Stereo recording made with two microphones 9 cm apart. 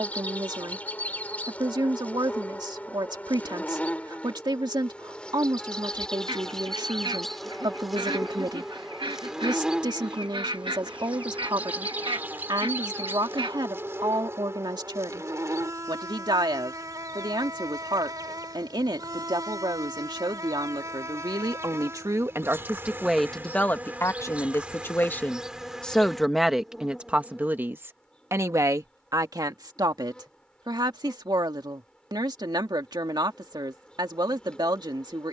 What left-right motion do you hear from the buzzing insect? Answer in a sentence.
You can hear the buzzing insect go right and come back.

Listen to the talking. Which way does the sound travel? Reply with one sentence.
You can hear the talking move from right to left and back again.